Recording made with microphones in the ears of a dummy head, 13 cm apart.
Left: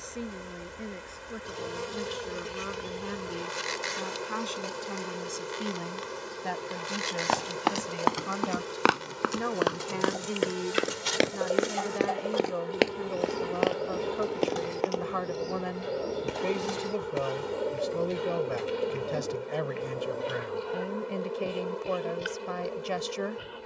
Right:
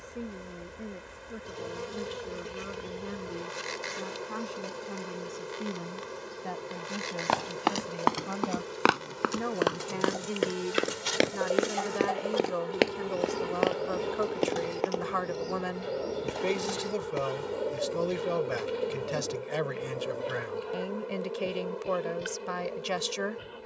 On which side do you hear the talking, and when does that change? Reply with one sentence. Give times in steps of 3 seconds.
You can hear the talking on the left from 0 s, in the centre from 9 s and on the right from 12 s.